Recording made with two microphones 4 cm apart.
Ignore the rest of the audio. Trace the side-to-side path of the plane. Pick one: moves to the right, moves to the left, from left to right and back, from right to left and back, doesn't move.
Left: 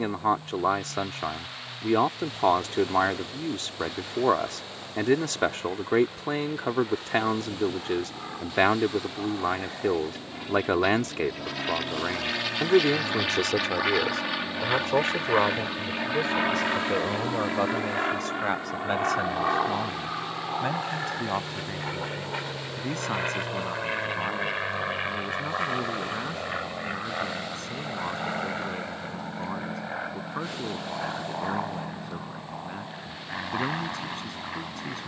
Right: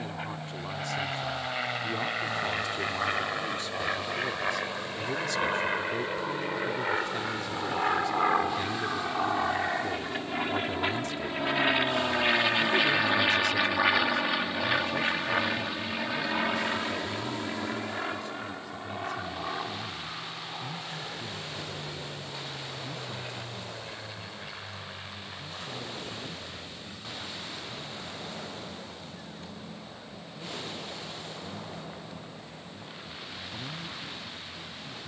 moves to the left.